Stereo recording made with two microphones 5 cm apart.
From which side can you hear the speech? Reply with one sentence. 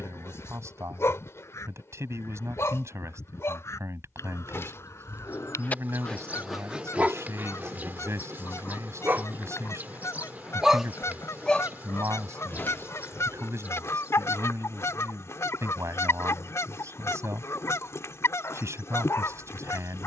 You can hear the speech on the right.